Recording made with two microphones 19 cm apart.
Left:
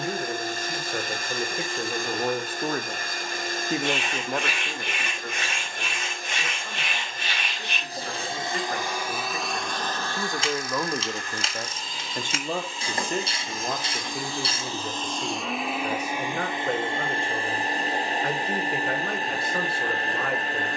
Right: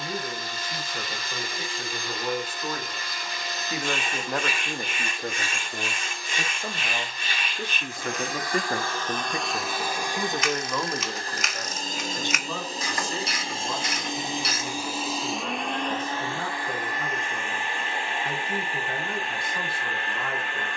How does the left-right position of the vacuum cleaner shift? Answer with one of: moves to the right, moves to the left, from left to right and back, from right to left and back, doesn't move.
from left to right and back.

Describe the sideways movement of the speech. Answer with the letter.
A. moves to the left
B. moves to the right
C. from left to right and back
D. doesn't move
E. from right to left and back
C.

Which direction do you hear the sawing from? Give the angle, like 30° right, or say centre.
70° left.